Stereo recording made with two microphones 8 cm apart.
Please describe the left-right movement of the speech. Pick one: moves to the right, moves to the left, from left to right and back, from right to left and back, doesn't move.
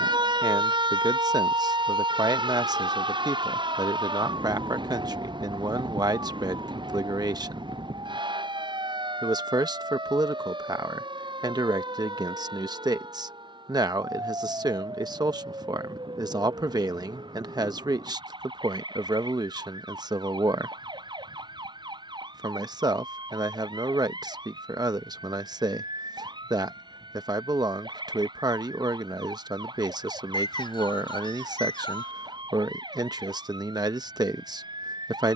doesn't move.